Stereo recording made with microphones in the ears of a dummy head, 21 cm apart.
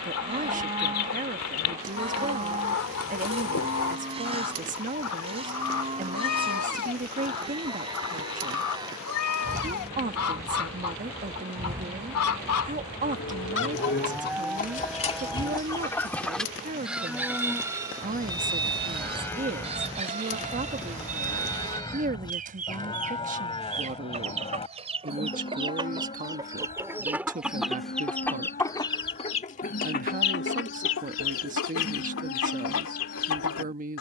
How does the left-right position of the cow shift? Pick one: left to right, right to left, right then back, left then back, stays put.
right to left.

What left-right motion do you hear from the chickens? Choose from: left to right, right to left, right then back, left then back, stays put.
right then back.